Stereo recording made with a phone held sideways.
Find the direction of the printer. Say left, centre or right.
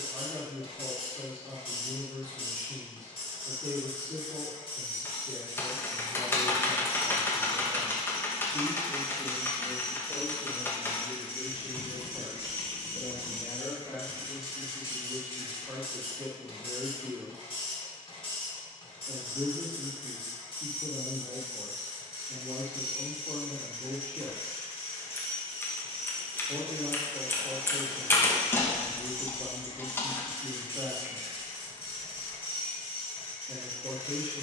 left.